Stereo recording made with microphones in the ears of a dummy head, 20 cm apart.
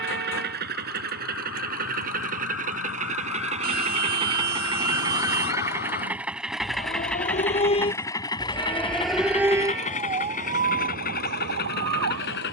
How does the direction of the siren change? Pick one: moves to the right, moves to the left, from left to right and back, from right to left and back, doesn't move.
moves to the right.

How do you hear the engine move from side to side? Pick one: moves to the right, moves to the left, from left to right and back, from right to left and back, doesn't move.
moves to the left.